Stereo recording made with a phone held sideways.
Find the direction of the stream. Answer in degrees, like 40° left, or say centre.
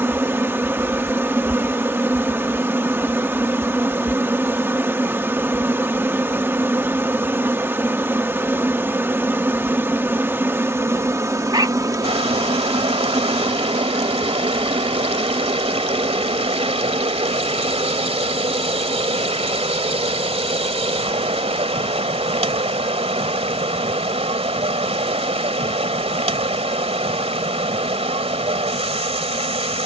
40° right.